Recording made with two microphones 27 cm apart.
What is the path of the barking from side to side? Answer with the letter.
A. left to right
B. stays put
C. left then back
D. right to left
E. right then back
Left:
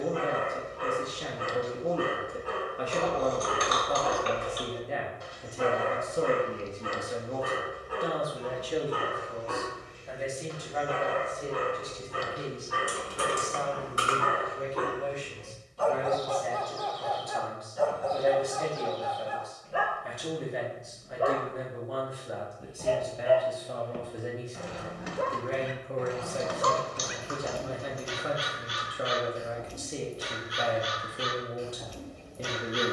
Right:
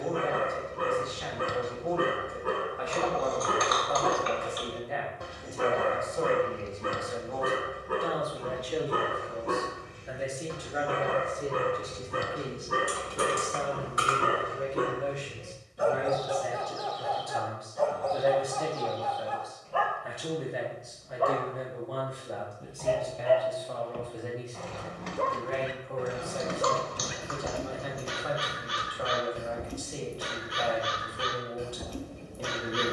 C.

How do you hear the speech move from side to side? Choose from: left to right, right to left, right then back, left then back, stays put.
right then back.